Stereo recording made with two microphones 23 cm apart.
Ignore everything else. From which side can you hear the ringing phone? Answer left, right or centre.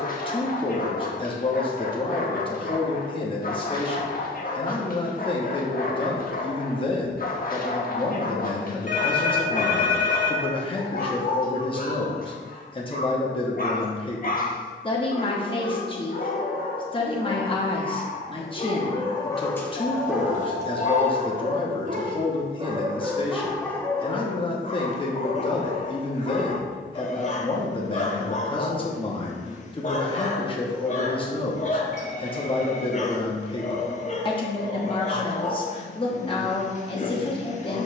left.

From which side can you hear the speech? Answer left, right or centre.
left.